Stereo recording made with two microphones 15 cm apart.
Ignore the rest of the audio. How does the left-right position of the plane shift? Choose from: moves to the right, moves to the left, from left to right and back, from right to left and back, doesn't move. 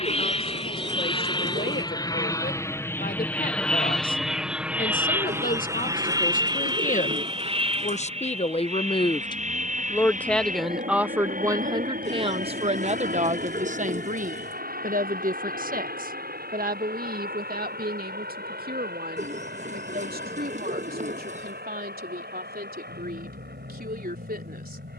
moves to the right.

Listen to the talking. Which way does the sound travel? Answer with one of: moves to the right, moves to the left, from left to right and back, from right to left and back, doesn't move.
moves to the right.